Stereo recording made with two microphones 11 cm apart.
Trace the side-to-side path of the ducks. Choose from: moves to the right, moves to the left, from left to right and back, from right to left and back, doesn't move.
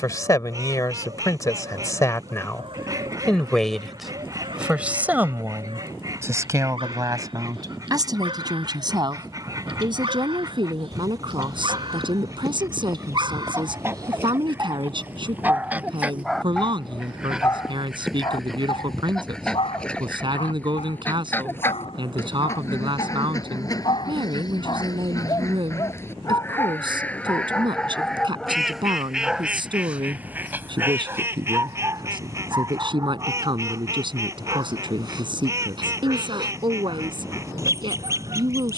from right to left and back.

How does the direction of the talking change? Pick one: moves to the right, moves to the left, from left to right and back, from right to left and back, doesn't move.
moves to the right.